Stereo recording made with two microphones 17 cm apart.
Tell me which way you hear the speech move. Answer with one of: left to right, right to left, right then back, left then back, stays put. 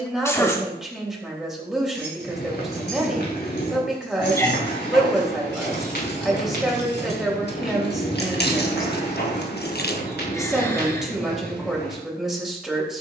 stays put.